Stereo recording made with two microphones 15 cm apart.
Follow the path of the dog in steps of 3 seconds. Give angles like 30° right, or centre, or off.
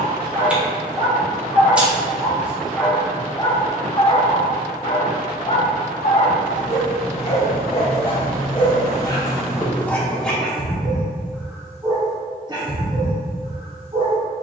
20° right, 40° left, 40° left, 10° left, 30° right.